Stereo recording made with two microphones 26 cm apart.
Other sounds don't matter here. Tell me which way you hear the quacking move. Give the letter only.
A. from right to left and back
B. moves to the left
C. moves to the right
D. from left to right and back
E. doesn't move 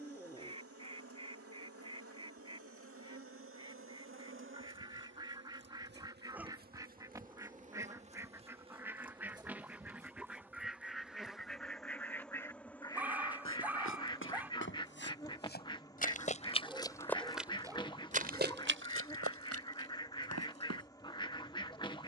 B.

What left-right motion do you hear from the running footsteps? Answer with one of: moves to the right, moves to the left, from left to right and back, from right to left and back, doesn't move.
moves to the right.